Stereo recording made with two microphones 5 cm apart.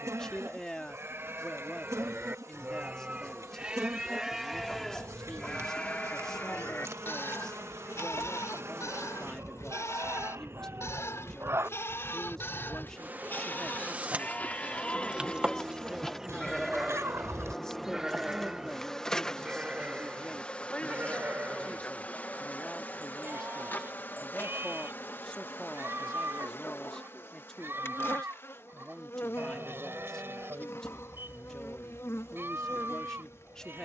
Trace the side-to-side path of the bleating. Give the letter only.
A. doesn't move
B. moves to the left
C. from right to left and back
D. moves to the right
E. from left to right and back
C.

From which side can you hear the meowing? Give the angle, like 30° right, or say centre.
60° right.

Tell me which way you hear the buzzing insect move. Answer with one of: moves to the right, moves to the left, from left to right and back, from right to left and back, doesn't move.
moves to the left.